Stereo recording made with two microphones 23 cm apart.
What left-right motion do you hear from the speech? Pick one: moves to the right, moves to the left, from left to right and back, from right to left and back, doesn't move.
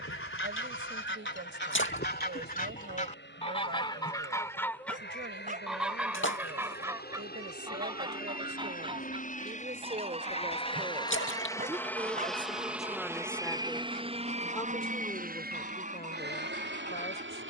moves to the left.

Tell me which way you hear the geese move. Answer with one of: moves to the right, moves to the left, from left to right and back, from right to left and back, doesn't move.
moves to the right.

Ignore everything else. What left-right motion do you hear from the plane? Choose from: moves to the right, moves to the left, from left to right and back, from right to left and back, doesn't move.
moves to the right.